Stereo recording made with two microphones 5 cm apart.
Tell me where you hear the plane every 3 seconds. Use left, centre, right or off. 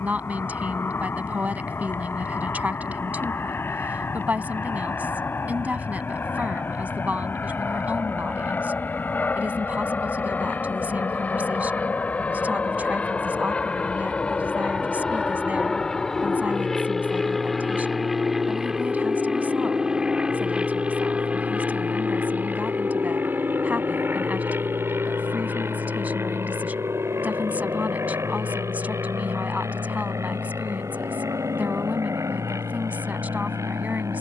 left, left, left, left, left, centre, centre, right, right, right, right, right.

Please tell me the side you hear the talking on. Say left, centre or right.
right.